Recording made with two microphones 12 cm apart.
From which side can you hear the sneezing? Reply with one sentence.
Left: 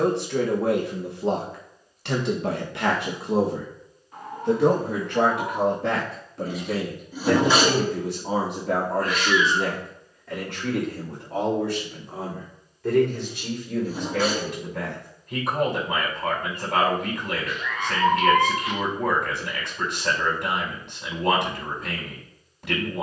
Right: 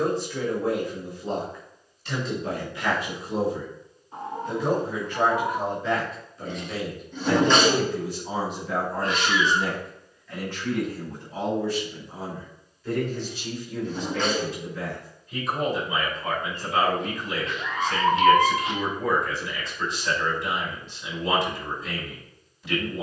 In this clip you hear the sneezing in the centre.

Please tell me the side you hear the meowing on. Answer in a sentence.
You can hear the meowing on the right.